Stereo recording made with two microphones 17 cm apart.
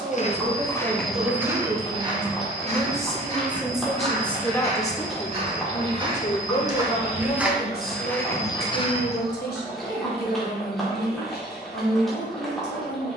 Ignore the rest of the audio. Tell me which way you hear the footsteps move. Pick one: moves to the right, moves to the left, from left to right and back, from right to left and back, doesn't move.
from left to right and back.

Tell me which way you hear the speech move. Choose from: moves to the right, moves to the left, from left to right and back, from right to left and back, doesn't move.
moves to the left.